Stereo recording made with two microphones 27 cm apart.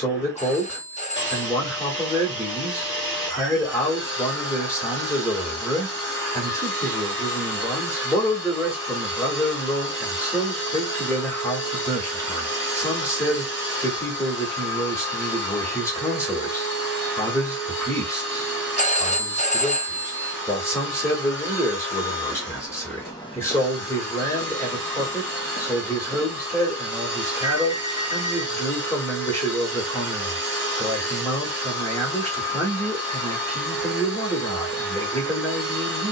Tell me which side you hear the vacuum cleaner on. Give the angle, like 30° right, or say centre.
40° left.